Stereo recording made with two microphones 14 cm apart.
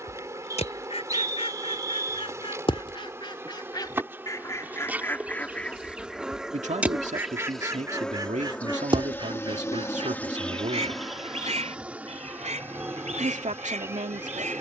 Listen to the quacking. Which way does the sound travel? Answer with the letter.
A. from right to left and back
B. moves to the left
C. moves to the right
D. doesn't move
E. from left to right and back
C.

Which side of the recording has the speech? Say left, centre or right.
right.